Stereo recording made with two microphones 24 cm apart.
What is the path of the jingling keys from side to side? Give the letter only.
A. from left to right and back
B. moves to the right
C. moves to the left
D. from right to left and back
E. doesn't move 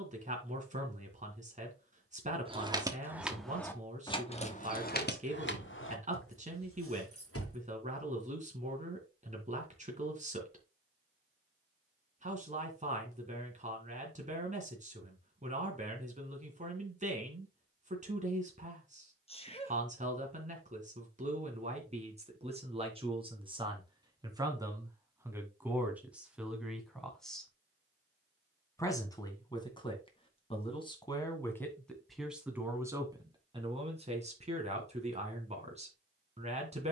C.